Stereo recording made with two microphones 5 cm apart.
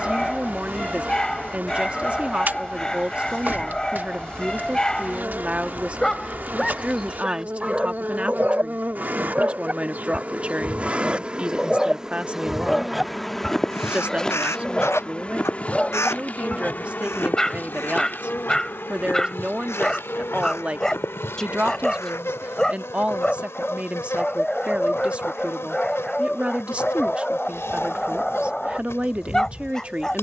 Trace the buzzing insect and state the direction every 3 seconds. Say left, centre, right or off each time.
right, right, right, right, centre, left, left, left, left, left.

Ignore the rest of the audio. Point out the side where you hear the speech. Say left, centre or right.
right.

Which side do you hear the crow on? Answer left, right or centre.
left.